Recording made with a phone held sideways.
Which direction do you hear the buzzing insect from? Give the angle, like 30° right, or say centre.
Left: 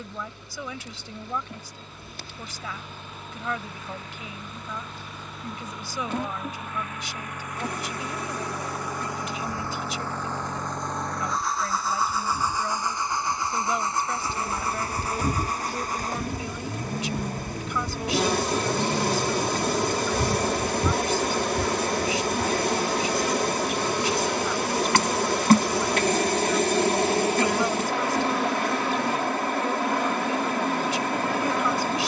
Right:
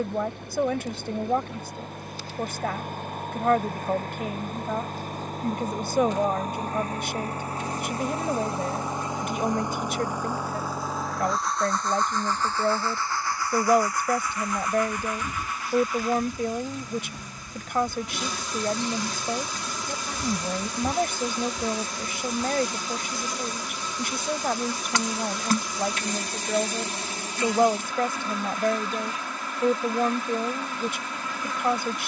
60° left.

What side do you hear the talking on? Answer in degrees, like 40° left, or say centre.
60° right.